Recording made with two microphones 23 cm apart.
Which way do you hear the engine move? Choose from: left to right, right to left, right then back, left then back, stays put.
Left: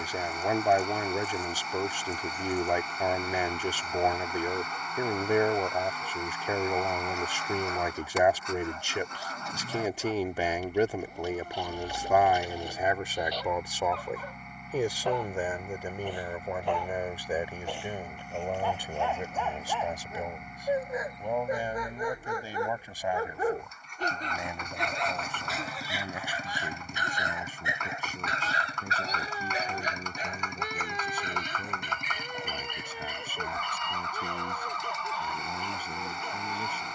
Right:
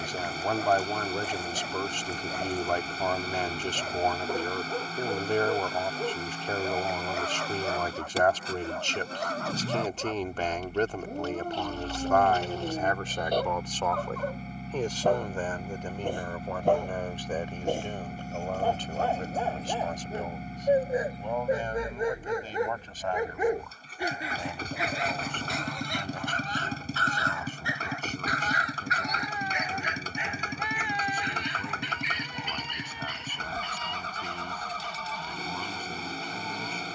stays put.